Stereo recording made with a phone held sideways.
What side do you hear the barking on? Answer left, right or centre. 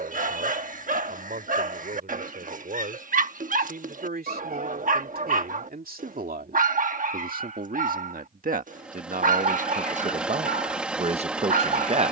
right.